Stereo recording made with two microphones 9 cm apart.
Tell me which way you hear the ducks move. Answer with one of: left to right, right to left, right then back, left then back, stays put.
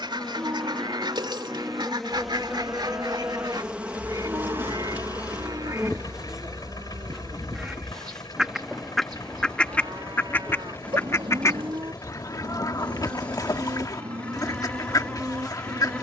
right to left.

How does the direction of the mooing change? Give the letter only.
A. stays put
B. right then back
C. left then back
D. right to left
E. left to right
A.